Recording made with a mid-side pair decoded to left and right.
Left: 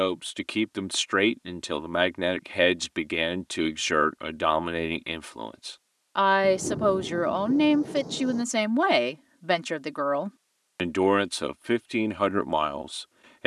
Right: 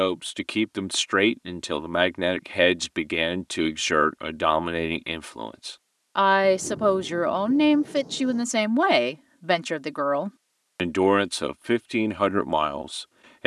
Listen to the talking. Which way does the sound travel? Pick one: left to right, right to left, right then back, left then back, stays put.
stays put.